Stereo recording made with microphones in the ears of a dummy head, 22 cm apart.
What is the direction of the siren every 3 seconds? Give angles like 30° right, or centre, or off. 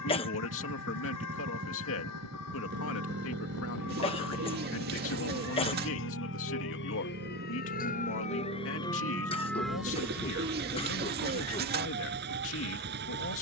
80° left, 70° left, 40° left, 10° right, 40° right.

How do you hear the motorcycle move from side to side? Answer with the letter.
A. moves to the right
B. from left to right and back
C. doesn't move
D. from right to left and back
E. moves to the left
C.